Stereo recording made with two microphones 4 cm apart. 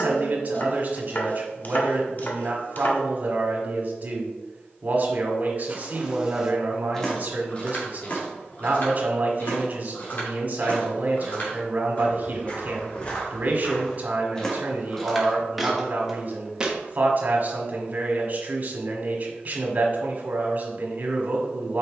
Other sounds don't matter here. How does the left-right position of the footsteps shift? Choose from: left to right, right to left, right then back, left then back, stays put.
left then back.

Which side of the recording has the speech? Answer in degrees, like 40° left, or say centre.
40° right.